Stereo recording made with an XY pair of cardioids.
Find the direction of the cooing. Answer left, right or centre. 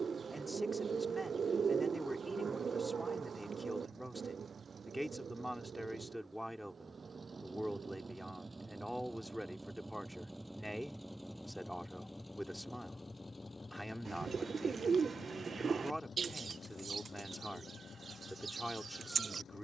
right.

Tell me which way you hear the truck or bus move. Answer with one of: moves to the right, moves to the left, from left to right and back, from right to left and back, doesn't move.
moves to the left.